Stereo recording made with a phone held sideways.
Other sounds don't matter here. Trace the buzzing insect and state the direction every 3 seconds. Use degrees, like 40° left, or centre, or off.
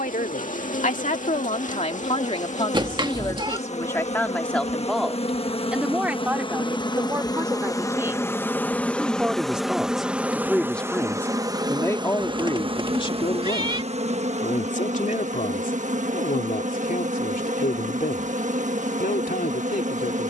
60° left, 50° left, 20° left, 10° right, 40° right, 50° right, 50° right.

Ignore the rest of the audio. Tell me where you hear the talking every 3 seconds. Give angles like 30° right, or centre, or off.
50° left, 10° left, 10° right, centre, 40° left, 70° left, 70° left.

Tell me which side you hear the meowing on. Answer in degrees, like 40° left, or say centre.
30° right.